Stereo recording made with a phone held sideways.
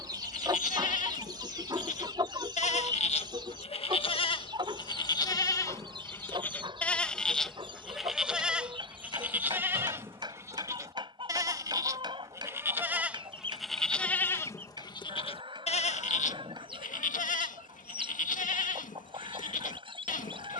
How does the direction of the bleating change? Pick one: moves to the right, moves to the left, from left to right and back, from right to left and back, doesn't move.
from left to right and back.